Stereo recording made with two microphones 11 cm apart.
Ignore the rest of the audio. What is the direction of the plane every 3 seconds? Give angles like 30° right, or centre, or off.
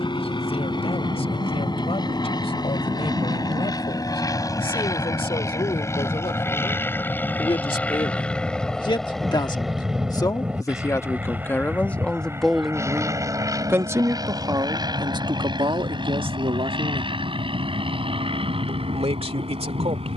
50° left, 40° left, 20° left, 10° right, 30° right, 50° right, 50° right.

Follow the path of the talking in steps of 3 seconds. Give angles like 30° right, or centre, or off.
70° left, 70° left, 60° left, 30° left, 10° right, 50° right, 70° right.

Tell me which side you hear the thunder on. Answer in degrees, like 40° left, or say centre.
50° right.